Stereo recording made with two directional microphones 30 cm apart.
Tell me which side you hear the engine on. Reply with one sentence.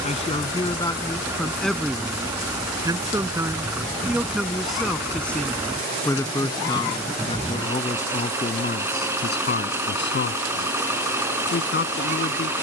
You can hear the engine in the centre.